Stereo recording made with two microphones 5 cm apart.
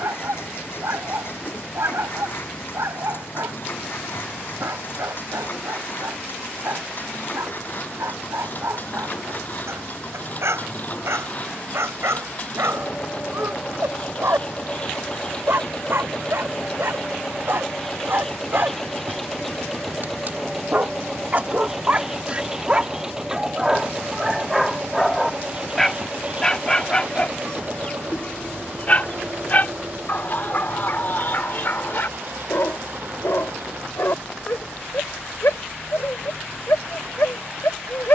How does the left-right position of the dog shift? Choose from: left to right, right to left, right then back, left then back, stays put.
right to left.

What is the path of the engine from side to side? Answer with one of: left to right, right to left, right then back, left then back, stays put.
left to right.